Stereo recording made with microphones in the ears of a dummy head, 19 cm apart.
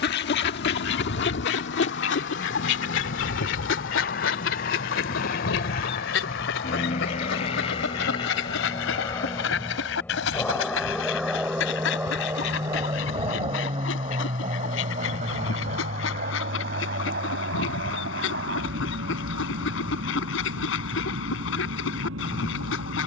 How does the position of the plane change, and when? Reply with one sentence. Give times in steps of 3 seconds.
You can hear the plane on the left from 0 s, in the centre from 9 s and on the right from 12 s.